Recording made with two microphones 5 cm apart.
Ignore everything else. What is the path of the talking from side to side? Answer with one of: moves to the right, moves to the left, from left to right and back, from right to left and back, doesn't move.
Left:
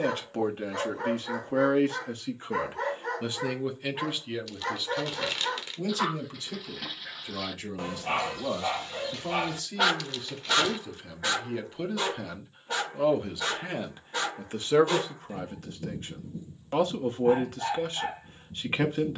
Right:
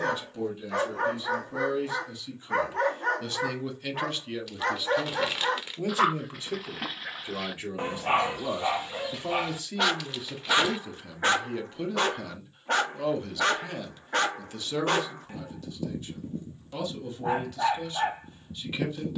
from left to right and back.